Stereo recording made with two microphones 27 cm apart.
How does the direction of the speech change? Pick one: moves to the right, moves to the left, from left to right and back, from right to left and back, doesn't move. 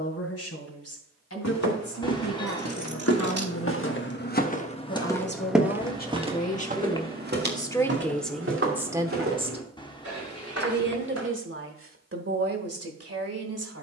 moves to the right.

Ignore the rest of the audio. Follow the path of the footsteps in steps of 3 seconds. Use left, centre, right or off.
left, left, right, right, off.